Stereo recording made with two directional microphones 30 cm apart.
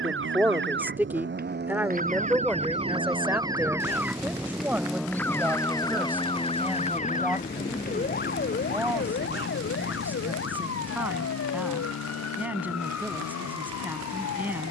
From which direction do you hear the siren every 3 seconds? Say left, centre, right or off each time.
right, centre, left, left, left.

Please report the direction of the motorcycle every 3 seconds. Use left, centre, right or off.
right, centre, left, left, left.